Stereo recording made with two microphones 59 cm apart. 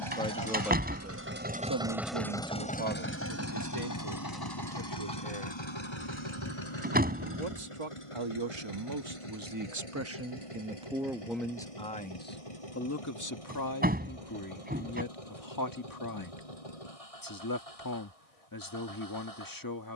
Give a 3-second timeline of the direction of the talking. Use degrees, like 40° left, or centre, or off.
20° right, 70° right, 50° right, 10° right, 30° left, 30° left, 30° left.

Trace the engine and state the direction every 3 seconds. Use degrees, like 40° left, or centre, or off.
10° right, 40° left, 60° left, 60° left, 70° left, 70° left, 70° left.